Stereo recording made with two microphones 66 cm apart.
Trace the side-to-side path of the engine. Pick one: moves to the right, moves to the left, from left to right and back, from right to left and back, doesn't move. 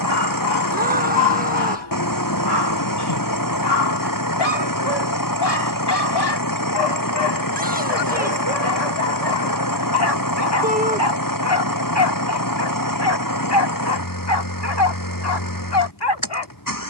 doesn't move.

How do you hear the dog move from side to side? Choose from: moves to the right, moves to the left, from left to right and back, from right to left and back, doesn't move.
doesn't move.